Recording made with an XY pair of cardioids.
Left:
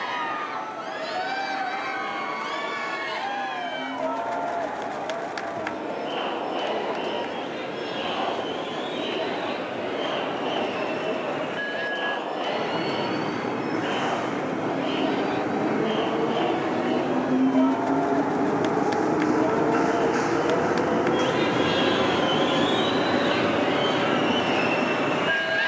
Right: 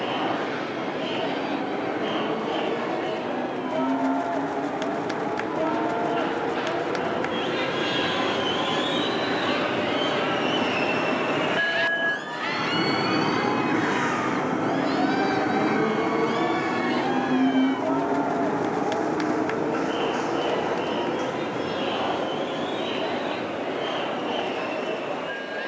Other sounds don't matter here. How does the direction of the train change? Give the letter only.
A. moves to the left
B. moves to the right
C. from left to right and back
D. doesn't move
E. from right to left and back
A.